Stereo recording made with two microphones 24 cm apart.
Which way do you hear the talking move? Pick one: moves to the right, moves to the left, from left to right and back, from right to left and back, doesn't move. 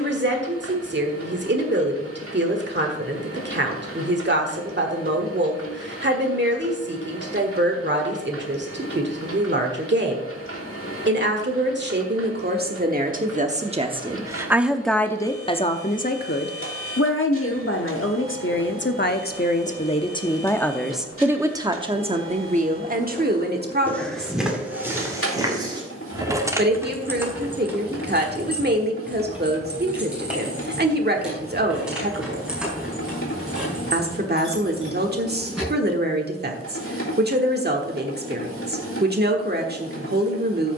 from right to left and back.